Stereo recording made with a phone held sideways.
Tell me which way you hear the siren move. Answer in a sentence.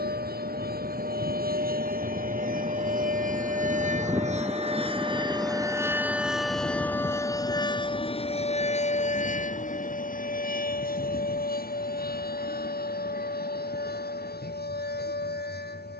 In this clip you hear the siren move to the left.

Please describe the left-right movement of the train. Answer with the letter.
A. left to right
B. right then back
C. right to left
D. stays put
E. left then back
C.